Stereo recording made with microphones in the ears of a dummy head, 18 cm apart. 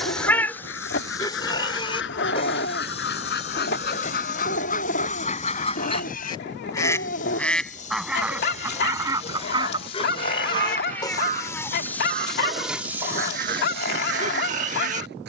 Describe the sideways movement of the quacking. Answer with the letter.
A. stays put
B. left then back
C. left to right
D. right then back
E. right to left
C.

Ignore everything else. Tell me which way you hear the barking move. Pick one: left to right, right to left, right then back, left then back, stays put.
stays put.